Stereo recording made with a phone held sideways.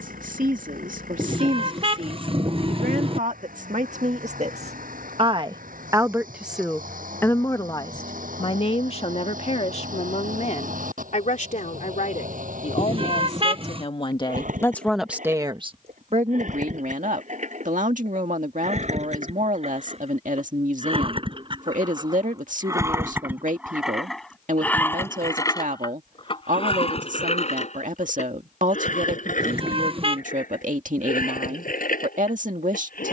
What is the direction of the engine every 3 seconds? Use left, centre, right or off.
right, right, right, right, right, right, right, right, left, left, left.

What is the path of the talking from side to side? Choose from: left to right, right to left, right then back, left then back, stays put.
left then back.